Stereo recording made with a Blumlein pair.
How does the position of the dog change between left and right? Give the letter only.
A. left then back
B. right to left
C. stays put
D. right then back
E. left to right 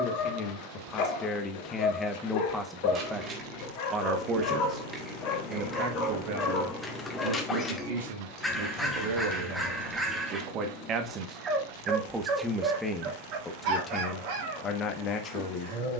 E.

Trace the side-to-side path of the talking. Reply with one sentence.
In this clip you hear the talking move from left to right and back again.